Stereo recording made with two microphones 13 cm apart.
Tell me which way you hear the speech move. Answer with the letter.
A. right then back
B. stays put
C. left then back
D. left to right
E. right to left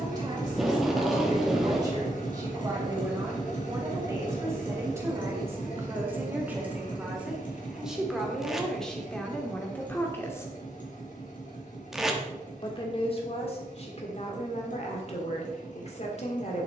E.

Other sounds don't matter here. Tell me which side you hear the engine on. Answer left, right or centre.
left.